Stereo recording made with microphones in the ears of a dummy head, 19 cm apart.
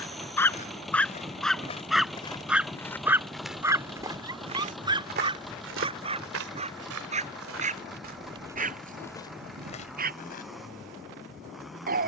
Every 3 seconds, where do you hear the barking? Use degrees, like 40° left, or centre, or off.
centre, 20° right, 40° right, 40° right.